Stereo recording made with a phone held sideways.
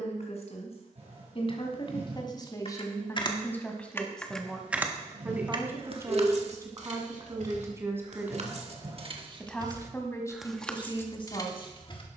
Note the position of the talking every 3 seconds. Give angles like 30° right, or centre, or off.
40° left, centre, 20° right, 30° left.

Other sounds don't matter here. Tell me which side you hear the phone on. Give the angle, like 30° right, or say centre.
50° right.